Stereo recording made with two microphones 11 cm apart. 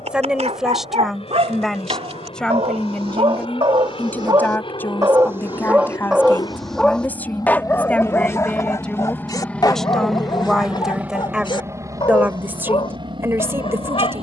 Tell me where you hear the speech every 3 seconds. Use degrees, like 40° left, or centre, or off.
centre, 10° left, 10° left, centre, 20° right.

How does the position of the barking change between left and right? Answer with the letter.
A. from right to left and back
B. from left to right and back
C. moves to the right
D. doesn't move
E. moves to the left
E.